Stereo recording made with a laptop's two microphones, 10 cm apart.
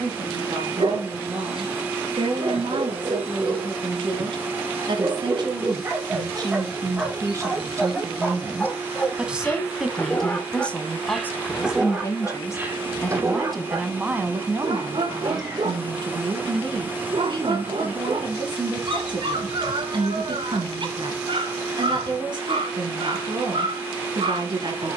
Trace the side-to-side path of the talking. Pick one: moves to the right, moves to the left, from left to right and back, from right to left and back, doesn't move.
from right to left and back.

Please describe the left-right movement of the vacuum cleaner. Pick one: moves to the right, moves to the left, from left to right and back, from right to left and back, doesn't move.
doesn't move.